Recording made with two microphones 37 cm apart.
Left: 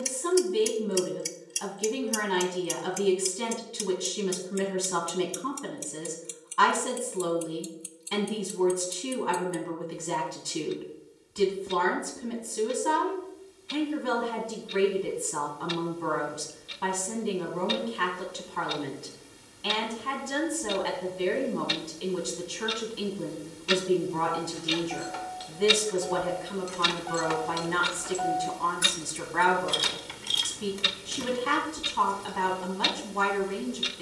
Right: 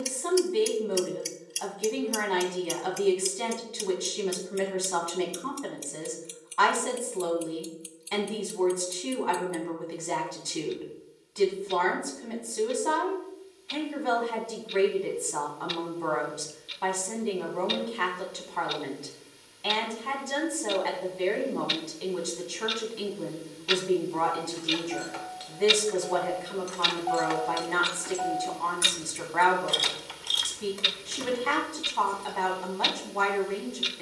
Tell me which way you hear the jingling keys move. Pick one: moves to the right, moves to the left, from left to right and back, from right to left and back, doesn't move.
from left to right and back.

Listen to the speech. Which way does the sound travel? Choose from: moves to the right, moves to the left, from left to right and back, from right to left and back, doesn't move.
doesn't move.